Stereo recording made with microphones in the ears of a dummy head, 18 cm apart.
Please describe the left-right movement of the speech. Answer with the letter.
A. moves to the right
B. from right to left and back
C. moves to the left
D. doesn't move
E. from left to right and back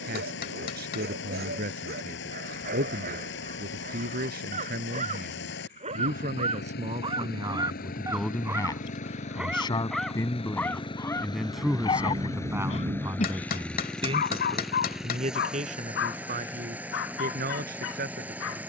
B.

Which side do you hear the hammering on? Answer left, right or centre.
left.